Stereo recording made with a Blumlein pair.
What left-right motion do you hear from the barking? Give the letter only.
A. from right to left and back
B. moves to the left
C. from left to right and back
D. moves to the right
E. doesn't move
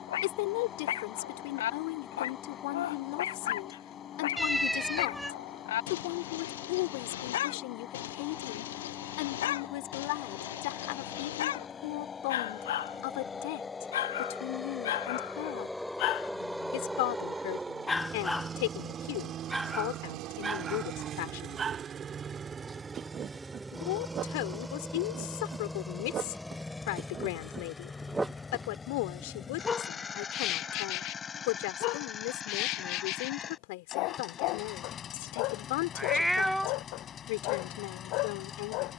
C.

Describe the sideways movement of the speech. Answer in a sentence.
You can hear the speech stay put.